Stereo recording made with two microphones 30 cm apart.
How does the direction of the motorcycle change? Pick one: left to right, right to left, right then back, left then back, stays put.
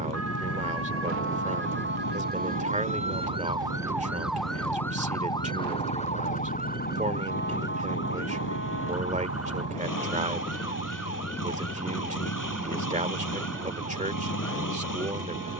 stays put.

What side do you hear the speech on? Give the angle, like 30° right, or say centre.
20° right.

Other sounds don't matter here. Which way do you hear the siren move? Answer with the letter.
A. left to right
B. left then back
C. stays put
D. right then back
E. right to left
E.